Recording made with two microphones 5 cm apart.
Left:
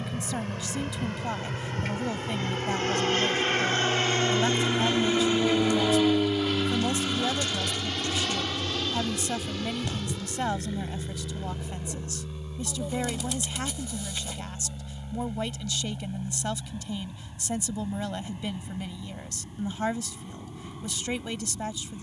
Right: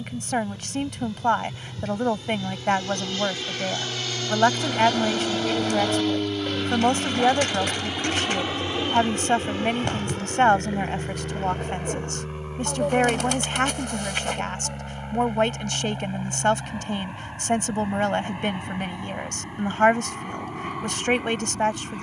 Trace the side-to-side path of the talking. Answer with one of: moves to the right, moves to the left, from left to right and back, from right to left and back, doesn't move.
doesn't move.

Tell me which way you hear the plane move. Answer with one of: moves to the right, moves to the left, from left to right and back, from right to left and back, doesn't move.
moves to the right.